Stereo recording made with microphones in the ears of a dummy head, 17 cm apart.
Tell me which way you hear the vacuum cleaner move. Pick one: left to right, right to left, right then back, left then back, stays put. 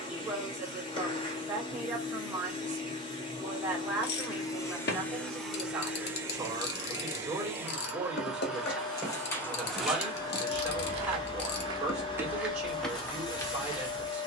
right then back.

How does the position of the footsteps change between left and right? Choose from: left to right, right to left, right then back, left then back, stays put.
right then back.